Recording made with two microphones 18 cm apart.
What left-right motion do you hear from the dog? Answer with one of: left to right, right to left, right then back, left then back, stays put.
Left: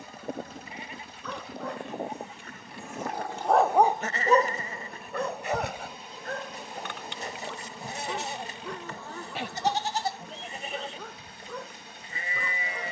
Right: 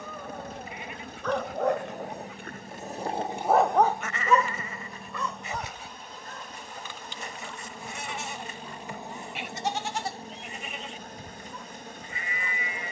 right to left.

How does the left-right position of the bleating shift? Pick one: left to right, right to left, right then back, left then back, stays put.
stays put.